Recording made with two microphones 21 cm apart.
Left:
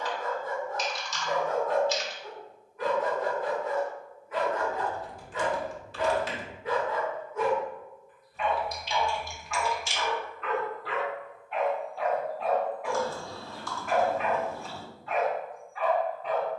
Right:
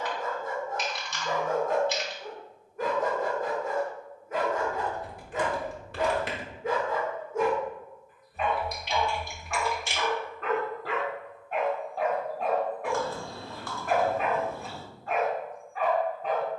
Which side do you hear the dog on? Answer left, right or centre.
right.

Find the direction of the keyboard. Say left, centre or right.
right.